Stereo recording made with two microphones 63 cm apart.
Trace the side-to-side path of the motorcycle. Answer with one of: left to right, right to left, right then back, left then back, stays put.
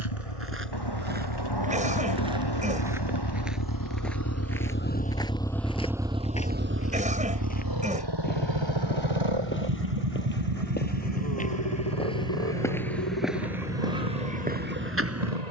left to right.